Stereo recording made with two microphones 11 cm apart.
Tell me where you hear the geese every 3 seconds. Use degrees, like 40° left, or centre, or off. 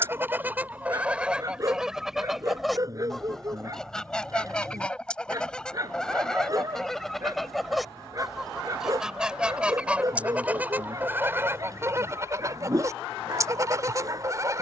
10° right, 10° left, centre, 20° right, 30° right.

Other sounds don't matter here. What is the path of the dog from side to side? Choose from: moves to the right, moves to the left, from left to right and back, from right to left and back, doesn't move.
doesn't move.